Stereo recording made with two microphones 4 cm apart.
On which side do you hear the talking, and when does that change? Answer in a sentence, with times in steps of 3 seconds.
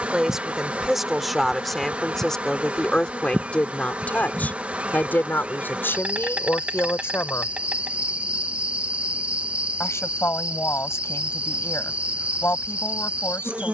In this clip you hear the talking in the centre from 0 s and on the left from 3 s.